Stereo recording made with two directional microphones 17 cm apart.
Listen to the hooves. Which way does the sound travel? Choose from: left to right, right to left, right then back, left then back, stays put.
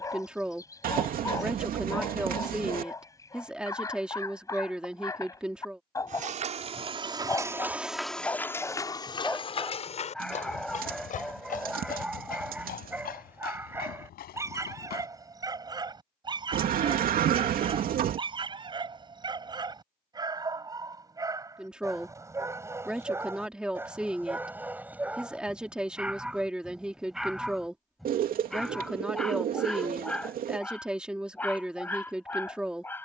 right to left.